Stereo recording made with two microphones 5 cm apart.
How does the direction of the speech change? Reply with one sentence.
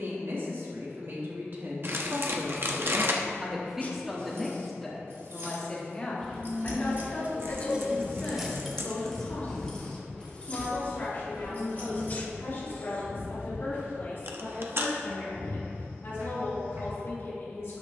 In this clip you hear the speech go from the right side to the left.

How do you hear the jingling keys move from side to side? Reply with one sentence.
In this clip you hear the jingling keys move to the left.